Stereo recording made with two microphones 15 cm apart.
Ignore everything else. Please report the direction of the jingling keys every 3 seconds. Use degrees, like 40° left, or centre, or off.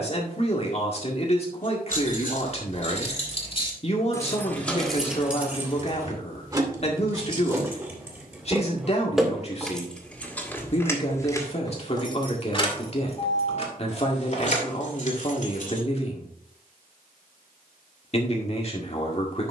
60° left, 10° left, 20° right, 10° left, 50° left, 60° left, off.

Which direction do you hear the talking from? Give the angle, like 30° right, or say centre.
40° left.